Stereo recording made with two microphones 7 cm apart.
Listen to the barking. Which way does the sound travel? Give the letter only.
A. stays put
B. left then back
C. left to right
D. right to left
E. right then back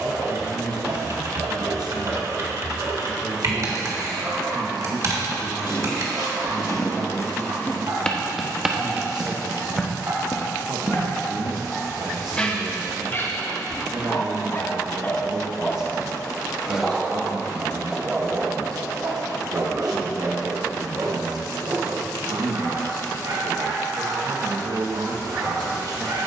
B.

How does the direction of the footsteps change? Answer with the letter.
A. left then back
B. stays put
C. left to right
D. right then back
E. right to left
D.